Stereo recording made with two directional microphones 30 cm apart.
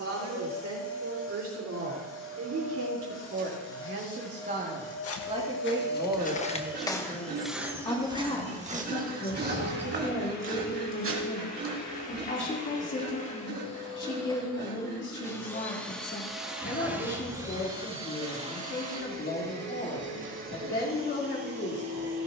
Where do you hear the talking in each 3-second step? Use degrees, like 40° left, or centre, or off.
60° right, 30° right, 10° left, 40° left, 40° left, 40° left, 40° left, 40° left.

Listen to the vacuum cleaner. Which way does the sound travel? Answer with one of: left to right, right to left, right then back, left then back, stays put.
left to right.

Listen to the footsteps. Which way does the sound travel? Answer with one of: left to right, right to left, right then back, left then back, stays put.
left to right.